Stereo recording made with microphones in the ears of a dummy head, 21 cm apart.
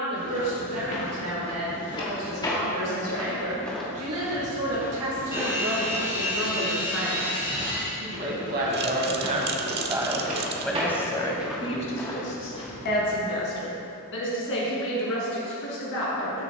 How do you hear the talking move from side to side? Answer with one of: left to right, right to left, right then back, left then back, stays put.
right to left.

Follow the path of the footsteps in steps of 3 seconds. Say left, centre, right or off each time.
left, centre, right, right, left, off.